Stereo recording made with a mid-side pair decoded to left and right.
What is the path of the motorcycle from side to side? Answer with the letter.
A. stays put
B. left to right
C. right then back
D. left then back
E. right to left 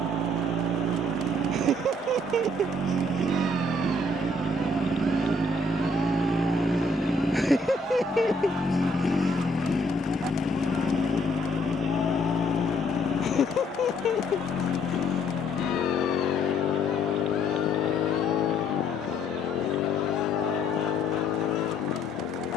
E.